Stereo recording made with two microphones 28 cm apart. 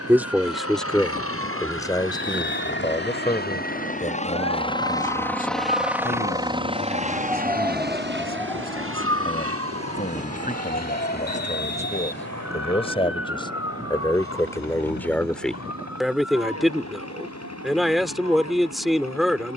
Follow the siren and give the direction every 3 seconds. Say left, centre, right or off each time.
right, right, centre, left, left, left, left.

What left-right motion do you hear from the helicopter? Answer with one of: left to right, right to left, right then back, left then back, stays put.
left to right.